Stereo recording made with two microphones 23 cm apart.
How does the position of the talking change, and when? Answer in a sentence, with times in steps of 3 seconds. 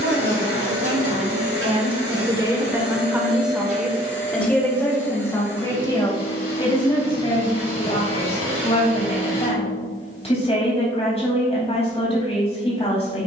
In this clip you hear the talking on the right from 0 s, in the centre from 3 s and on the left from 6 s.